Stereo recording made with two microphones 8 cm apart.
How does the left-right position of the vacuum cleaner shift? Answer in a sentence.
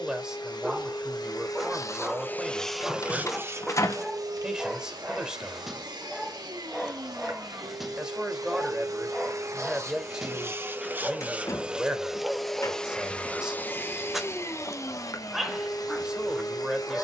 You can hear the vacuum cleaner move from left to right and back again.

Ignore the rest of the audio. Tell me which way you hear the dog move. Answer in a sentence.
In this clip you hear the dog stay put.